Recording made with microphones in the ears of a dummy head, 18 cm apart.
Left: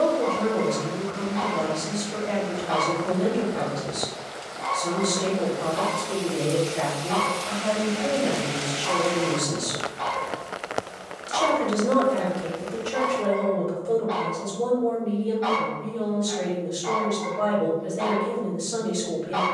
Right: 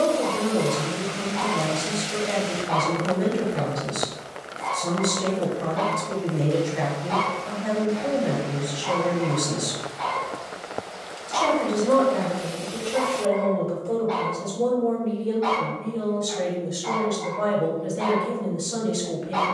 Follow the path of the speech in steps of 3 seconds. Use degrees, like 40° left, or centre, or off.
10° right, 10° right, 10° right, 10° left, 20° left, centre, 10° right.